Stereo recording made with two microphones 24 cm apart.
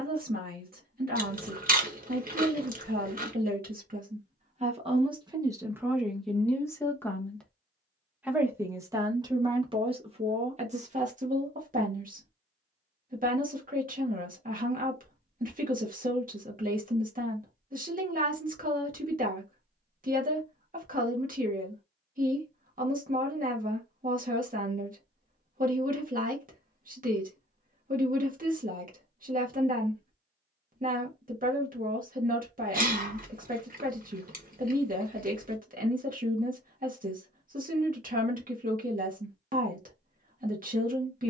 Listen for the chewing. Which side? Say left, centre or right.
right.